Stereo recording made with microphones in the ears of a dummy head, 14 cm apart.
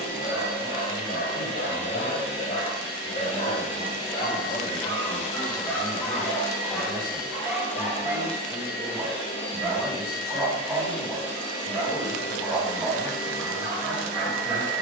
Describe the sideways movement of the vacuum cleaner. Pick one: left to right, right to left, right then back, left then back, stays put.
stays put.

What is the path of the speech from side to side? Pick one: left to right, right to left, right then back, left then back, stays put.
right then back.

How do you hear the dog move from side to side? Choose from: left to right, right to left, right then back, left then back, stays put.
left to right.